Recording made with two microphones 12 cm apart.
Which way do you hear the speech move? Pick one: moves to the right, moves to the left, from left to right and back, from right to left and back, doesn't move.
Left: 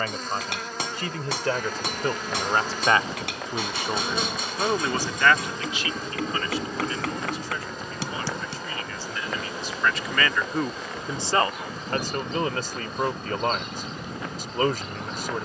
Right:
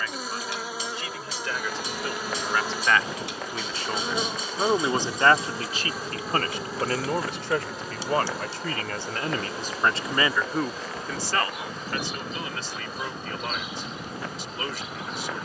from left to right and back.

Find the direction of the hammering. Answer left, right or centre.
left.